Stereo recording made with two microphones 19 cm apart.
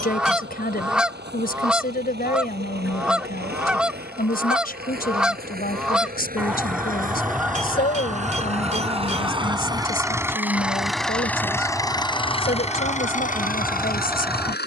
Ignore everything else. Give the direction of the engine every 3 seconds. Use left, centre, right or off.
right, right, right, centre, left.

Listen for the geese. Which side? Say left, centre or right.
centre.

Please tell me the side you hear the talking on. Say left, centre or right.
left.